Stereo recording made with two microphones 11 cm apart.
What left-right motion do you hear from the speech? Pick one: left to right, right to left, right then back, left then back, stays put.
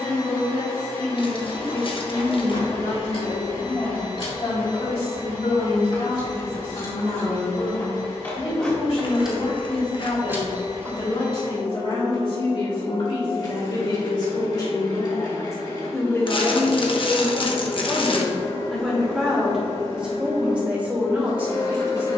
left to right.